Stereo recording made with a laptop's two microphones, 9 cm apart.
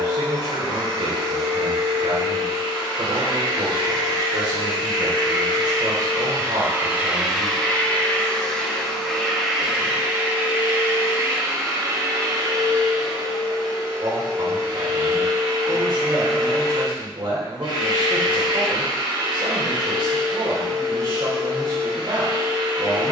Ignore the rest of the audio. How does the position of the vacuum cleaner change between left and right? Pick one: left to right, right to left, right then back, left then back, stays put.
left then back.